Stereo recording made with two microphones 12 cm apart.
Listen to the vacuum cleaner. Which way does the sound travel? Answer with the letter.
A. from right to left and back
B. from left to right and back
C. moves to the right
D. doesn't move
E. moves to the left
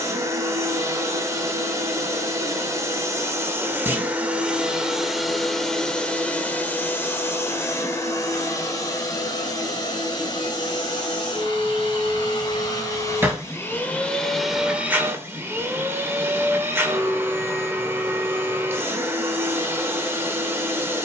A.